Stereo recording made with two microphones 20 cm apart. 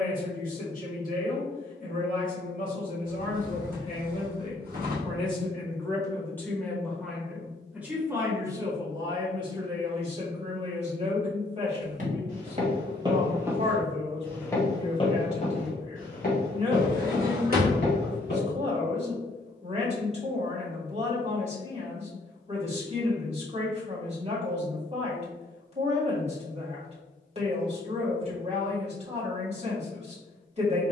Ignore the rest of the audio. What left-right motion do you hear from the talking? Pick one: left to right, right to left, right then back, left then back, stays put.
left to right.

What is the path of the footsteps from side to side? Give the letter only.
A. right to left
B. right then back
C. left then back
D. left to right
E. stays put
A.